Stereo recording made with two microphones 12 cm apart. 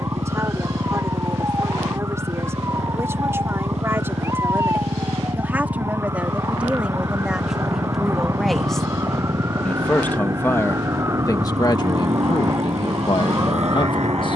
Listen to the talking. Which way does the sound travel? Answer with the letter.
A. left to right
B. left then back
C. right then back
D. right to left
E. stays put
D.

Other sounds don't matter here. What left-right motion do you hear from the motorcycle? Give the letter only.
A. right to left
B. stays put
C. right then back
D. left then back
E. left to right
B.